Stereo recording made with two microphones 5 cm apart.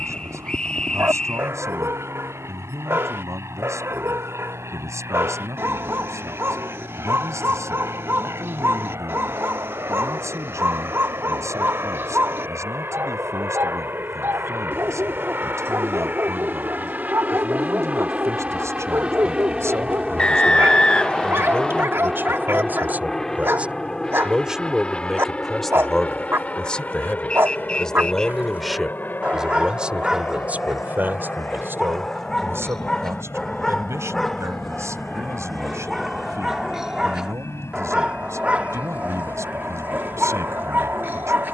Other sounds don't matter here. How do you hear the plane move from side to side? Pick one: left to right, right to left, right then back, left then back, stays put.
right to left.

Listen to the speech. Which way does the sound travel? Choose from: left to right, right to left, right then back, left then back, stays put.
left then back.